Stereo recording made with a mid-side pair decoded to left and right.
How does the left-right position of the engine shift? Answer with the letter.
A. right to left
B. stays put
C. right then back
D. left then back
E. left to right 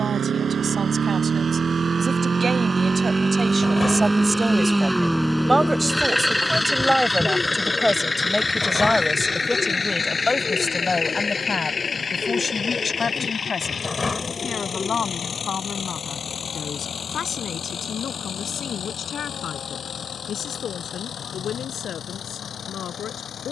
A.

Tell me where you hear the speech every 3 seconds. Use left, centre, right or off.
right, right, centre, left, left, left, left, left.